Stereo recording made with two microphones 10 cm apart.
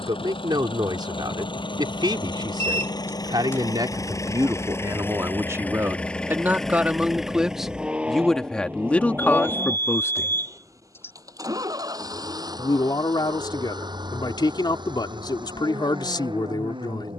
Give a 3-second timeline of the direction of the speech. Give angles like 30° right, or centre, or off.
50° right, 40° right, centre, 20° left, 50° left, 50° left.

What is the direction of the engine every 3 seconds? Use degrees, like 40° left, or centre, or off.
50° left, 30° left, 10° right, 30° right, 50° right, 50° right.